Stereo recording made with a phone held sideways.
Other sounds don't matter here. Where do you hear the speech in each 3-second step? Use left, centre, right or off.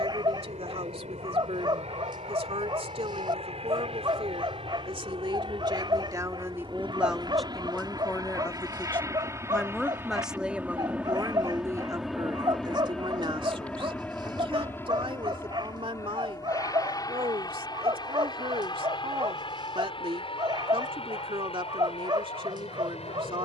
right, right, centre, centre, right, right, right, right.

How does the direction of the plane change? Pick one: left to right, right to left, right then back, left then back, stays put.
right to left.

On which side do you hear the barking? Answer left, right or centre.
right.